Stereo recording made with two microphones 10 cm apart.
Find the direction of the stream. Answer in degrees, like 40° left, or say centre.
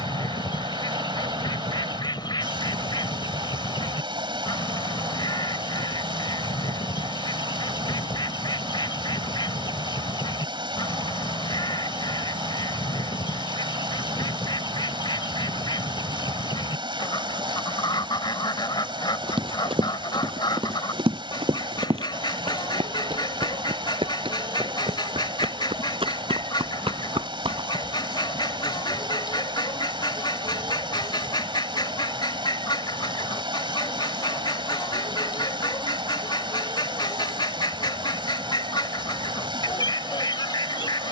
60° right.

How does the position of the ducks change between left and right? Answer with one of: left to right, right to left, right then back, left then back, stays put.
stays put.